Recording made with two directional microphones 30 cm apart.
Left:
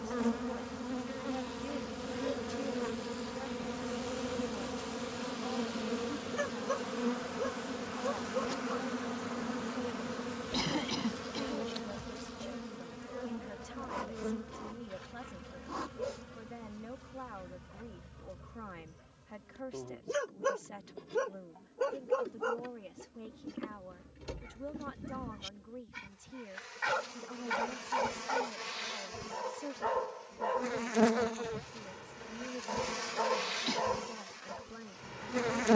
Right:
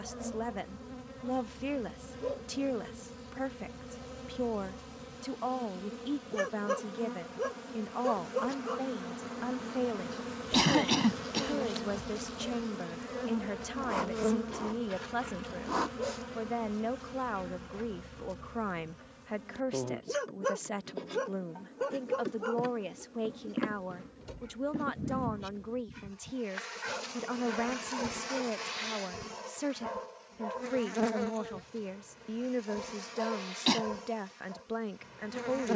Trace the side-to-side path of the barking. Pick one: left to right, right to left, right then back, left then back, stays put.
right to left.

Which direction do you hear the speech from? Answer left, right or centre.
right.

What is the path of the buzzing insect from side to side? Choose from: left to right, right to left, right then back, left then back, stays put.
right then back.